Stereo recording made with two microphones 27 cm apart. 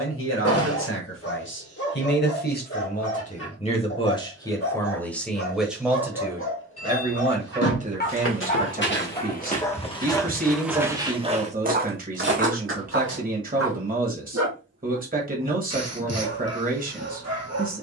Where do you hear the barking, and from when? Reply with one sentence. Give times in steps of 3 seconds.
You can hear the barking on the left from 0 s, in the centre from 9 s and on the right from 12 s.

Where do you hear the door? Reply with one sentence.
In this clip you hear the door on the left.